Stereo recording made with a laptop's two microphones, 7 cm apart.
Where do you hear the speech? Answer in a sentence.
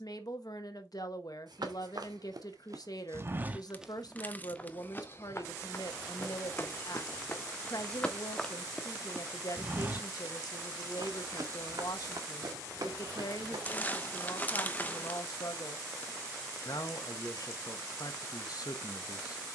You can hear the speech on the left.